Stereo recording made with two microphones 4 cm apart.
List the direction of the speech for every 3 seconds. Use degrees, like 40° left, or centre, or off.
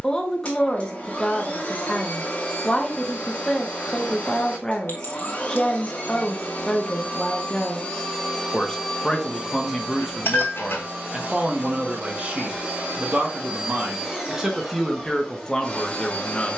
10° left, 10° left, 10° left, 10° right, 30° right, 10° left.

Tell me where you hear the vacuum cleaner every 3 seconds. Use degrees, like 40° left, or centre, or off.
30° left, 30° left, 20° left, 30° right, 20° right, 20° left.